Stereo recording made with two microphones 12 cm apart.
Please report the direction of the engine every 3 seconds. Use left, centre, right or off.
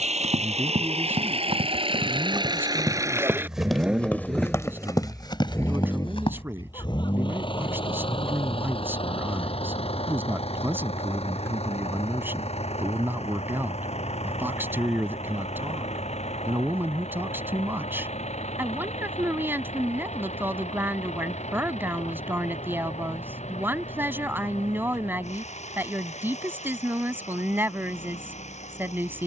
right, centre, left, left, left, left, left, left, left, left.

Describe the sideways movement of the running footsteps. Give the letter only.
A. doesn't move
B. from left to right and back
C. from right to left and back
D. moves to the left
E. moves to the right
D.